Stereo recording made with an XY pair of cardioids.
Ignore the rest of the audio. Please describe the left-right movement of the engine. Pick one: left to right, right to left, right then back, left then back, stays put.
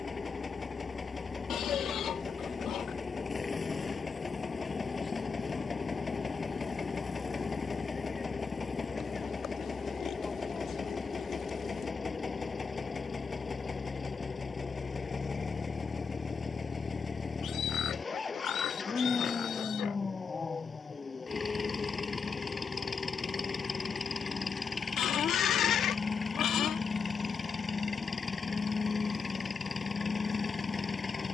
stays put.